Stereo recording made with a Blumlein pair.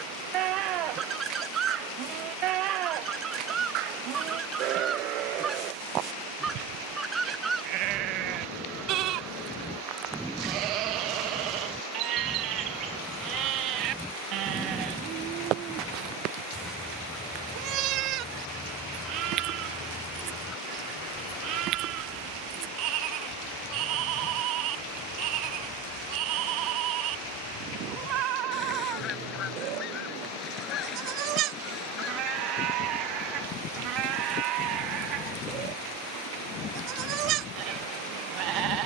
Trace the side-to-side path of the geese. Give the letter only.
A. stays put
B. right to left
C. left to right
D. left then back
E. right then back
B.